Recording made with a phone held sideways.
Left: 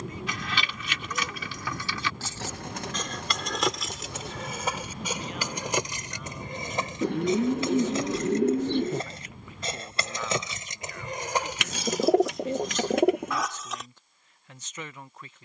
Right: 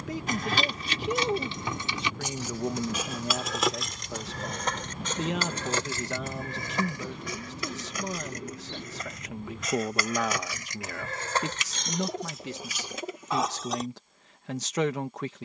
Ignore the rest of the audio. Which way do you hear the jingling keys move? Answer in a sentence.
You can hear the jingling keys go left and come back.